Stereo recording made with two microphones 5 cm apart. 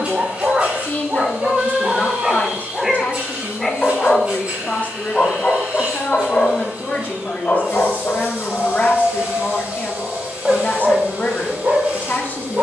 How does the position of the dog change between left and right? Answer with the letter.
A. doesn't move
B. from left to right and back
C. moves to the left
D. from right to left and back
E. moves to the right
D.